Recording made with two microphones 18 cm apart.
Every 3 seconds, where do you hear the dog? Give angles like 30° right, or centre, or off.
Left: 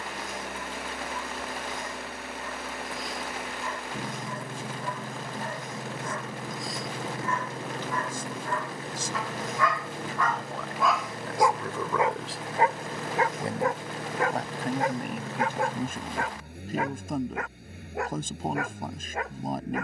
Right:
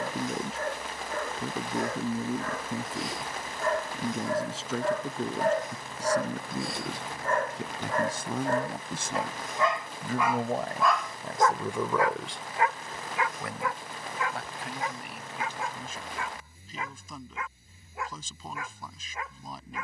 80° right, 70° right, 50° right, 10° right, 40° left, 60° left, 60° left.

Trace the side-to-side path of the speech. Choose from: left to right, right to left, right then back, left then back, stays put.
right to left.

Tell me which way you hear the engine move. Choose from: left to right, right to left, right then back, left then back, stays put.
stays put.